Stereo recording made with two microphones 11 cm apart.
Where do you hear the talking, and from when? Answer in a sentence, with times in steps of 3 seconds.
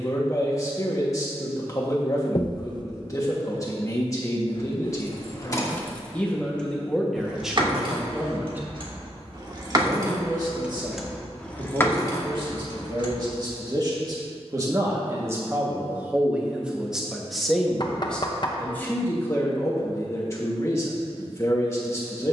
You can hear the talking on the left from 0 s, in the centre from 6 s, on the right from 9 s, in the centre from 15 s and on the left from 18 s.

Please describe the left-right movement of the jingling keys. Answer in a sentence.
You can hear the jingling keys move from left to right and back again.